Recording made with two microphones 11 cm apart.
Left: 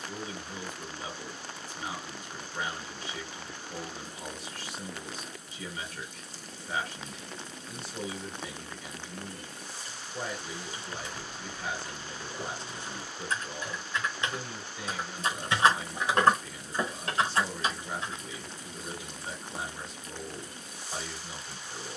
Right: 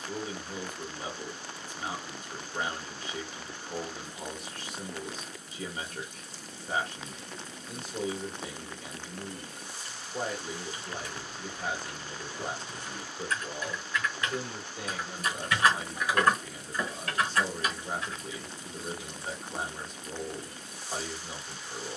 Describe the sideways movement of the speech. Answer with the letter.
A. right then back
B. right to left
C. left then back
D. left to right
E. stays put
E.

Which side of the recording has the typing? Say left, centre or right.
left.